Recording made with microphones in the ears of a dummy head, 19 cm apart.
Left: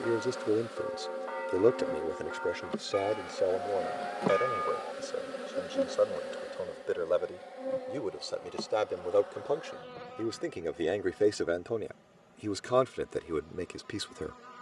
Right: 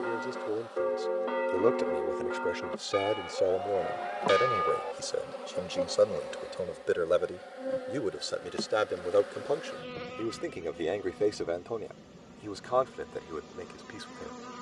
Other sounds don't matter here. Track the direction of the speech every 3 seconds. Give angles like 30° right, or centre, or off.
20° left, 20° right, 20° right, 10° left, 40° left.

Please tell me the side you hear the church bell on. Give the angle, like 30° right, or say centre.
50° right.